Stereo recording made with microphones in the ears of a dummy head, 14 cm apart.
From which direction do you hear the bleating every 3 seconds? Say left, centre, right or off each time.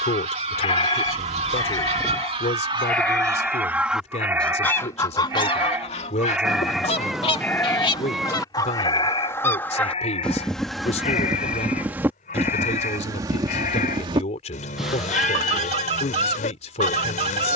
left, centre, centre, left, left, left.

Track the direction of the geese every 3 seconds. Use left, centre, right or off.
right, centre, left, centre, right, right.